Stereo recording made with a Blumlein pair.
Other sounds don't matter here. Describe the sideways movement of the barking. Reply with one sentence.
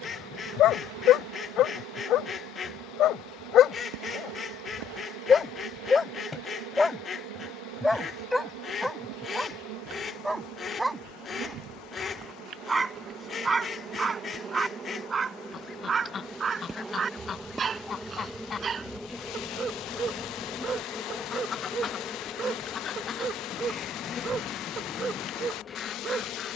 In this clip you hear the barking move from left to right.